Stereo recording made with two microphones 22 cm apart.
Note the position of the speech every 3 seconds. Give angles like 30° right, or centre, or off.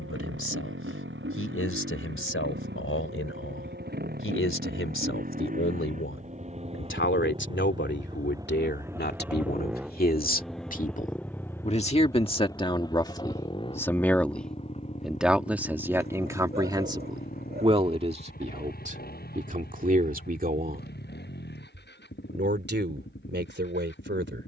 70° left, 70° left, 50° left, 40° left, 20° left, 10° right, 40° right, 50° right.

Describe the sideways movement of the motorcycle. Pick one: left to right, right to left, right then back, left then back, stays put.
right to left.